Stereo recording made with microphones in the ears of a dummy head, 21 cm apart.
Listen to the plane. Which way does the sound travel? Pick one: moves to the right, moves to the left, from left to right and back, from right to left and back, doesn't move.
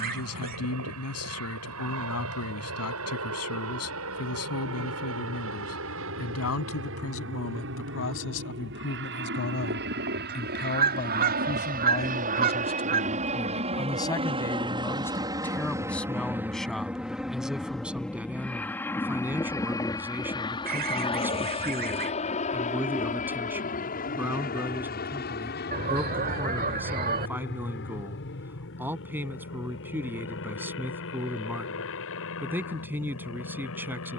moves to the left.